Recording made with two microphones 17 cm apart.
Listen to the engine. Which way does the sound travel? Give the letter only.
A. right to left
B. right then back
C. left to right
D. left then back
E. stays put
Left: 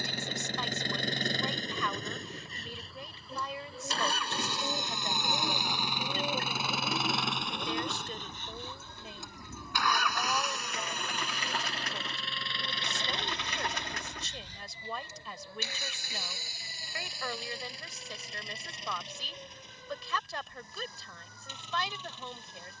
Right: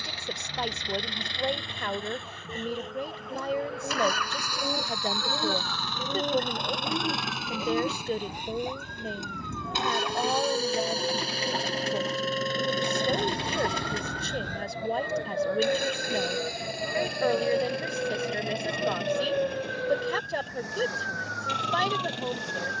C.